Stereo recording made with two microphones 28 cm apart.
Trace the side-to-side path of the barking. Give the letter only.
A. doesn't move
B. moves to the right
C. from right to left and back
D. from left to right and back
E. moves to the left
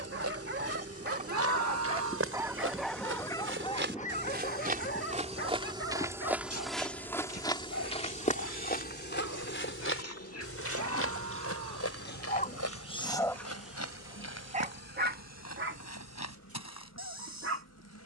C.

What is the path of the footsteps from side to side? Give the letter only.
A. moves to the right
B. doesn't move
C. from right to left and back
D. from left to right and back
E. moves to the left
E.